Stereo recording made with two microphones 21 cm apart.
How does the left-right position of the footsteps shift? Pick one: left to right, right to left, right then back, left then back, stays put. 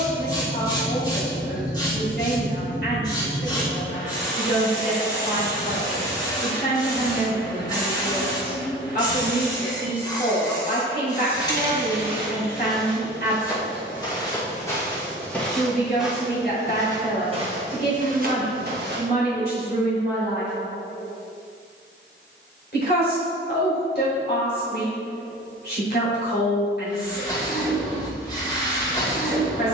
left then back.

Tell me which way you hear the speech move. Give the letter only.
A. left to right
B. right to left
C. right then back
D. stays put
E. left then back
D.